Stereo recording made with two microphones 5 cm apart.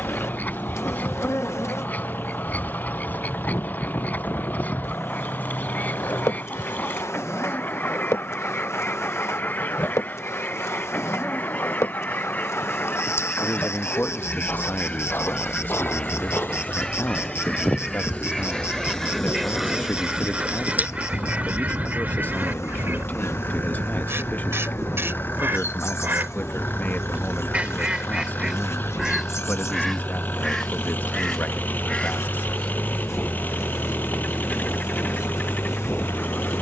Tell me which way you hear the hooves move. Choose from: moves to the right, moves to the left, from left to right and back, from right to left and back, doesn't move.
moves to the right.